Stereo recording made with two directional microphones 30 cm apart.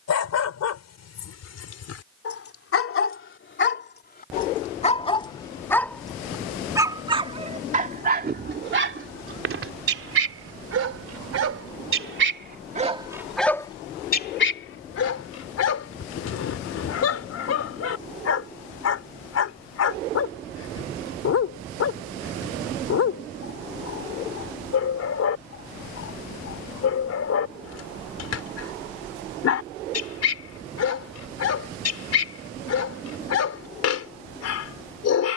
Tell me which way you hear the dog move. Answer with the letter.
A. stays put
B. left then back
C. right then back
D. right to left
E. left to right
C.